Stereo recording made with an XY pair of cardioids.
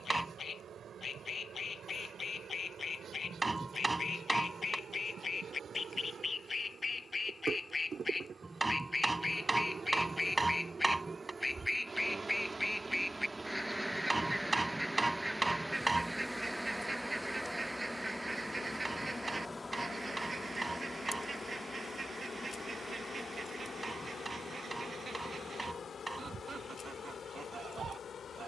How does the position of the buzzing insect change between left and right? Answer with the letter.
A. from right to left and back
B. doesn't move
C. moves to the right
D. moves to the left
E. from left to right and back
D.